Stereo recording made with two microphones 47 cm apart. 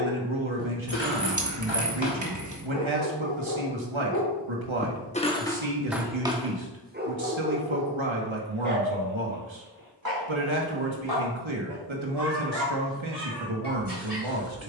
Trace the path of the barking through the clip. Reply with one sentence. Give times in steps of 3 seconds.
In this clip you hear the barking on the left from 0 s and on the right from 6 s.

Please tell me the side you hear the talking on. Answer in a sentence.
You can hear the talking on the right.